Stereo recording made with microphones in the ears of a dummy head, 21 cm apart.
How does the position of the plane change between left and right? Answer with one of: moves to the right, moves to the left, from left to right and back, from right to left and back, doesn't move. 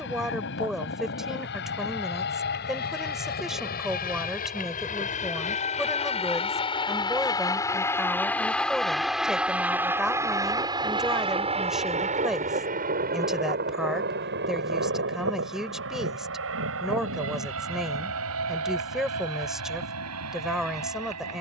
moves to the right.